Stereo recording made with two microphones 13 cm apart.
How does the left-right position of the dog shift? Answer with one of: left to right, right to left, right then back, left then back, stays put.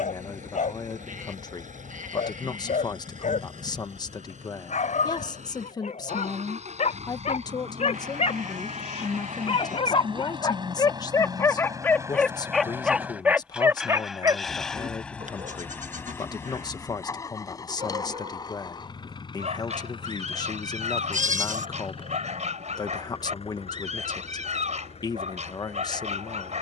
left to right.